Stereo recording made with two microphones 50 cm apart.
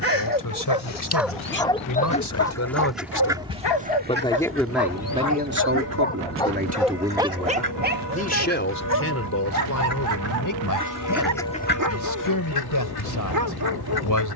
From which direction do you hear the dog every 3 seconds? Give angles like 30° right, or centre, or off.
centre, 40° left, 10° right, 40° right, 40° right.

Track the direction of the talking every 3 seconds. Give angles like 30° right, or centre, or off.
40° left, centre, centre, 40° left, 40° left.